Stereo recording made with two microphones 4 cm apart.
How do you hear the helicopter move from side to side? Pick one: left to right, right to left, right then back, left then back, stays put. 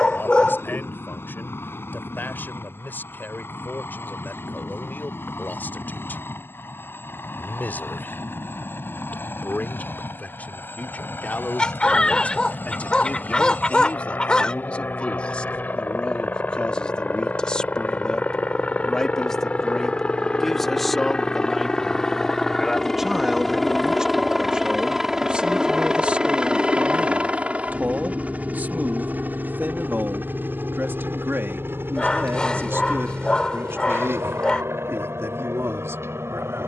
left to right.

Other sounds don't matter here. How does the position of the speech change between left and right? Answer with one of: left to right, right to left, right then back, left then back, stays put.
left to right.